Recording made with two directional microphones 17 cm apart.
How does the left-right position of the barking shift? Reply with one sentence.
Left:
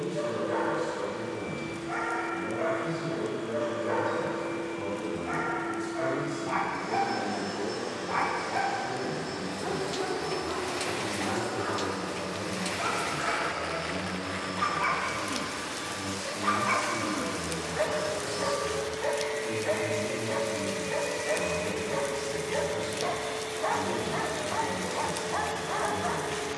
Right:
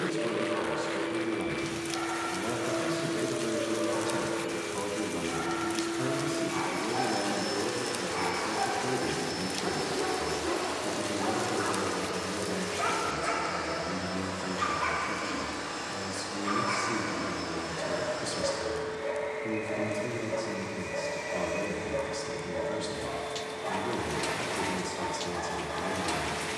You can hear the barking move from left to right and back again.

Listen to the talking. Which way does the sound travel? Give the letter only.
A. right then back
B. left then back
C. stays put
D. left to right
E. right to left
C.